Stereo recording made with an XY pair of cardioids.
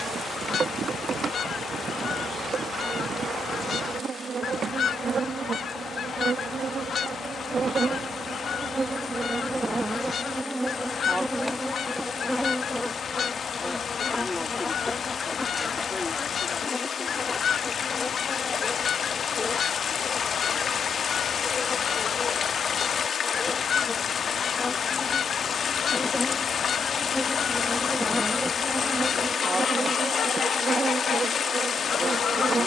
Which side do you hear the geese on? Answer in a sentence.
You can hear the geese on the left.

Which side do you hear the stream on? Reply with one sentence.
You can hear the stream on the left.